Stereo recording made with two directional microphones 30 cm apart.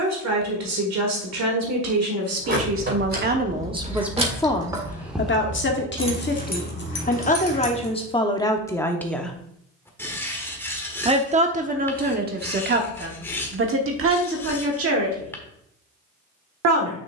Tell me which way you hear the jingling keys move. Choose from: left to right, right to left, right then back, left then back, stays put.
right to left.